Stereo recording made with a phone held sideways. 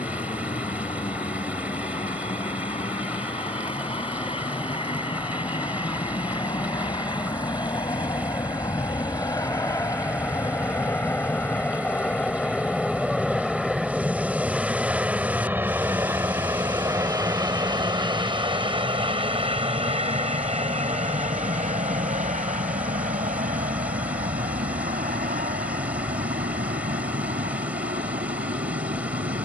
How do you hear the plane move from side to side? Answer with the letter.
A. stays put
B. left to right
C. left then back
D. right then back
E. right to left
B.